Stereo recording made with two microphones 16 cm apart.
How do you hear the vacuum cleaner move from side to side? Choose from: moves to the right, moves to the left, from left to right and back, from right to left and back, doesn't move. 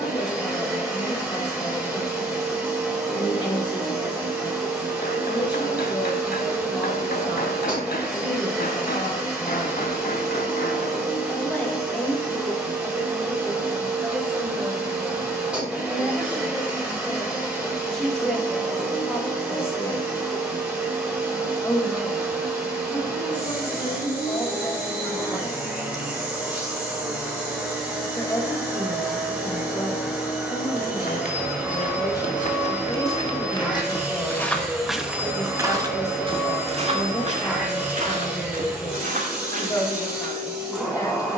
doesn't move.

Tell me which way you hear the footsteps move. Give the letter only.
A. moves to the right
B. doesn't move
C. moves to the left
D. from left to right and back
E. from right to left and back
A.